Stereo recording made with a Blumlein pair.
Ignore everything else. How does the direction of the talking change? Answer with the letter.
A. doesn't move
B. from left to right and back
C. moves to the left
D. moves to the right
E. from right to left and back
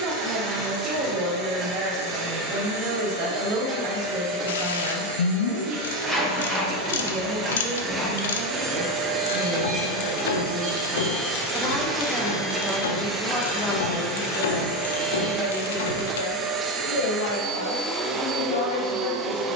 C.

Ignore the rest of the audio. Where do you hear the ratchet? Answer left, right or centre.
left.